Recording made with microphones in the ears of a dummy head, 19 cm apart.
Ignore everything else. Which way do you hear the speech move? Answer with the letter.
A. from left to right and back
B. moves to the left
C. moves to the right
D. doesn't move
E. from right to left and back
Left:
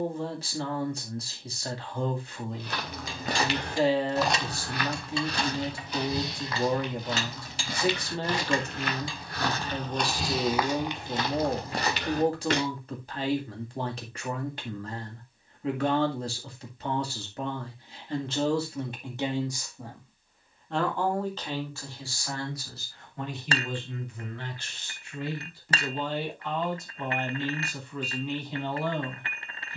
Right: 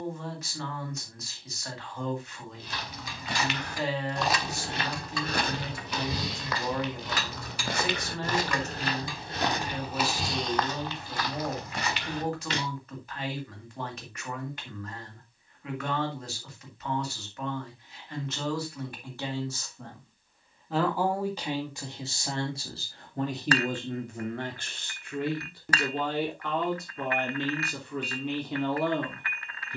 C.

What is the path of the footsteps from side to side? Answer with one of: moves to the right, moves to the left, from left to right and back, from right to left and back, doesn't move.
from left to right and back.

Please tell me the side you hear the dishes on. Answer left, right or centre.
left.